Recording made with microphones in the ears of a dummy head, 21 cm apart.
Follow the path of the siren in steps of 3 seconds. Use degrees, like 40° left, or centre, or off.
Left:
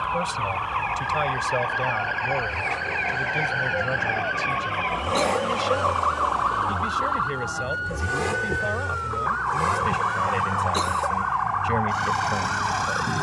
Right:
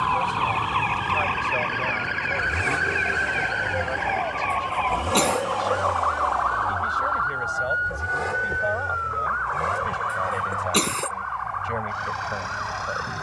40° right, 10° left, 50° left, 60° left, 60° left.